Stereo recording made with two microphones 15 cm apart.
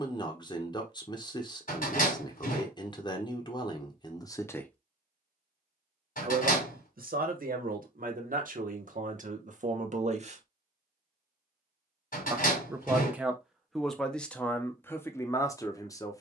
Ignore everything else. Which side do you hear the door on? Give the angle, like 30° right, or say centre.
70° left.